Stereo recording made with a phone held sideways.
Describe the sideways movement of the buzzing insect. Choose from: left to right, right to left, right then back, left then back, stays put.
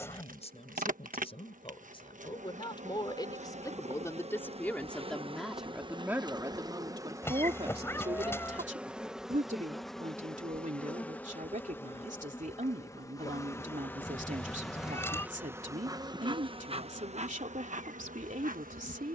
left then back.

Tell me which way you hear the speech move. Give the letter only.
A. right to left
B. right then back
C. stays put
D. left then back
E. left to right
E.